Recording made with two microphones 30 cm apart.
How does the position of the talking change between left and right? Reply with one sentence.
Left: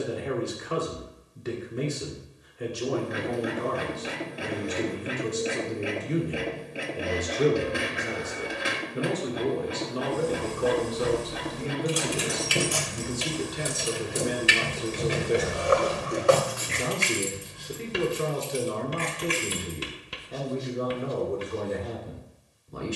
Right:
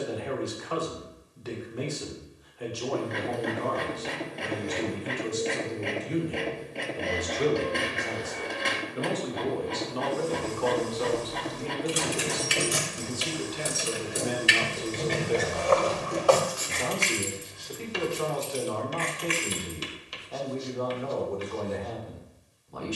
In this clip you hear the talking stay put.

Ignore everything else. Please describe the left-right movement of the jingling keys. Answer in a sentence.
You can hear the jingling keys travel towards the left.